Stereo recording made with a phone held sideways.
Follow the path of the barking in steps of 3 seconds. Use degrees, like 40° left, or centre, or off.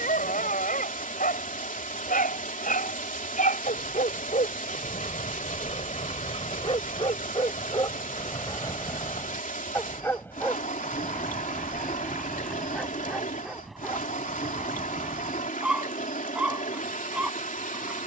70° left, 60° left, 30° left, 10° left, centre, 10° right.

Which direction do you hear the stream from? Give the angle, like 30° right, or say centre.
70° left.